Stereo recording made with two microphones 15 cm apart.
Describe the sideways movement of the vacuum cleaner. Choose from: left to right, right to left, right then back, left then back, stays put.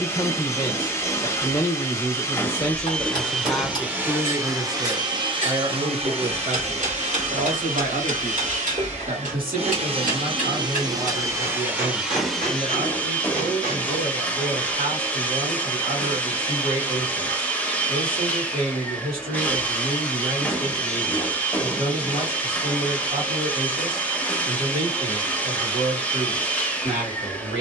right then back.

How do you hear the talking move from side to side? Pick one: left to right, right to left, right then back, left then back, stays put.
left to right.